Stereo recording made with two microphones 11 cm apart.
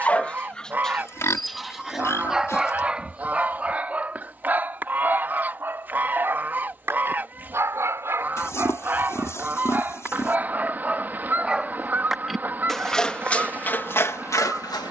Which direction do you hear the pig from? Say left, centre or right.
left.